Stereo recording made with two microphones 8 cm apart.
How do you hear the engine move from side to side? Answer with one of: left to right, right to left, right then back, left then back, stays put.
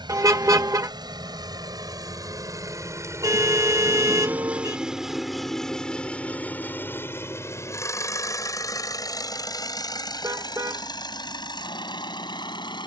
right to left.